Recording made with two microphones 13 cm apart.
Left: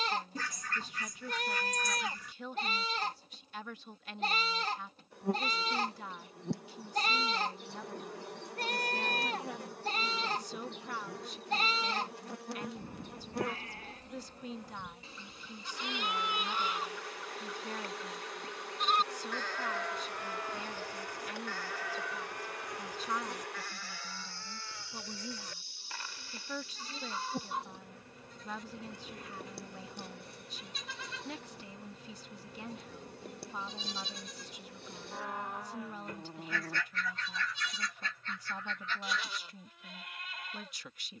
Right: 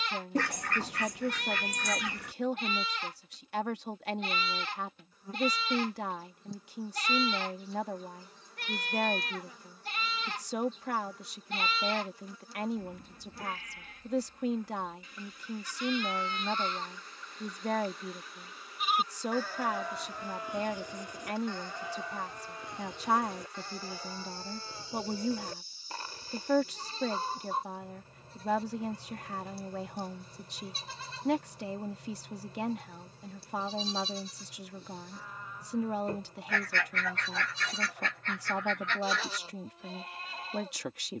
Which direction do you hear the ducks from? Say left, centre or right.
right.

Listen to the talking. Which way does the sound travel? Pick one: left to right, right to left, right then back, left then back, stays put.
stays put.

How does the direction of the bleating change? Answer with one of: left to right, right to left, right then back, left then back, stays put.
left to right.